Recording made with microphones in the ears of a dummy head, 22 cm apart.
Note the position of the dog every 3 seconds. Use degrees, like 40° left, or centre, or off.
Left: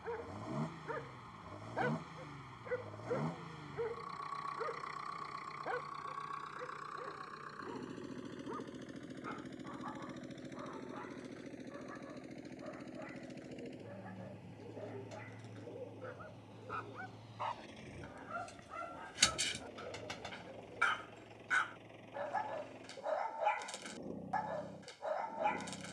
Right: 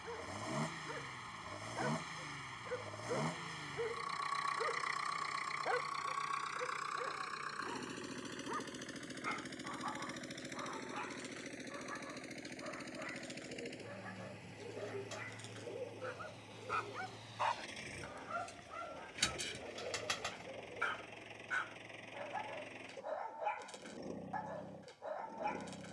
20° left, 10° right, 50° right, 70° right, 80° right, 70° right, centre, 20° left, 20° left.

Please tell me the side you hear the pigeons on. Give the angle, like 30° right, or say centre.
50° right.